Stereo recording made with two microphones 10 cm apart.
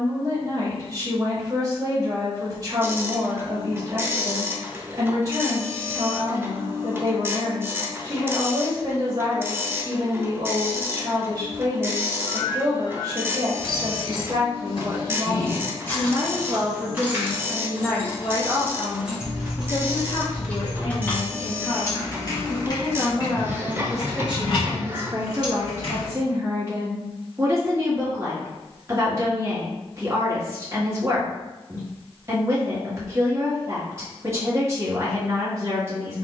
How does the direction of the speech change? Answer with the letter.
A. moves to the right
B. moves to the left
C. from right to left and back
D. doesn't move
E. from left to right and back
C.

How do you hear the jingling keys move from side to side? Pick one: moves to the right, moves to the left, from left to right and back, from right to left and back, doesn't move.
from left to right and back.